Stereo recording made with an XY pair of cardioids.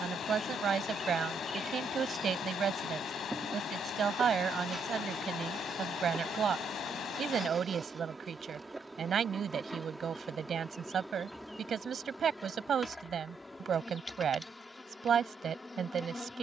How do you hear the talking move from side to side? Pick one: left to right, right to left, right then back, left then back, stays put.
stays put.